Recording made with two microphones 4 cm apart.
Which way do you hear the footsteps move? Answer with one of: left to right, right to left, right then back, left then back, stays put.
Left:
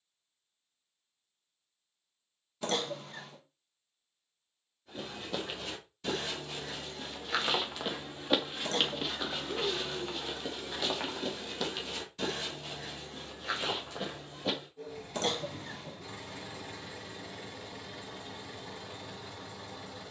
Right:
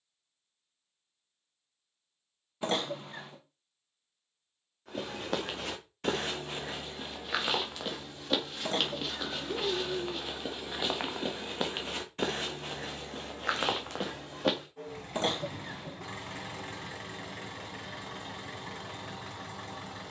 left then back.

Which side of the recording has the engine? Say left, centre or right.
right.